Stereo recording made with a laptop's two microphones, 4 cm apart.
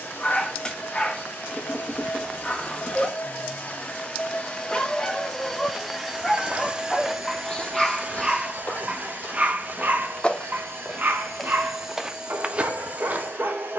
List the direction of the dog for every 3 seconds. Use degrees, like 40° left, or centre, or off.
20° left, 20° left, centre, 50° right, 60° right.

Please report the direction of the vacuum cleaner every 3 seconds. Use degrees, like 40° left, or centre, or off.
60° left, 30° left, 40° right, 70° right, 70° right.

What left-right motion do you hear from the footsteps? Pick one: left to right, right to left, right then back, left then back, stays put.
left then back.